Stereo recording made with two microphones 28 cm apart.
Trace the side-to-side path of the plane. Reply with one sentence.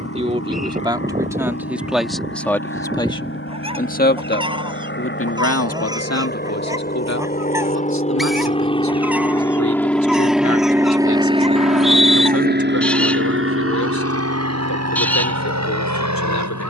You can hear the plane travel towards the right.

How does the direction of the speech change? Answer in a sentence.
In this clip you hear the speech move from right to left.